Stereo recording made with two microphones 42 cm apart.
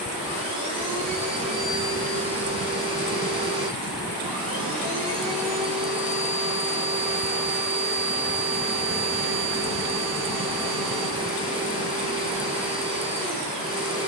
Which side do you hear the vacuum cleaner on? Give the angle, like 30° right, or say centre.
10° right.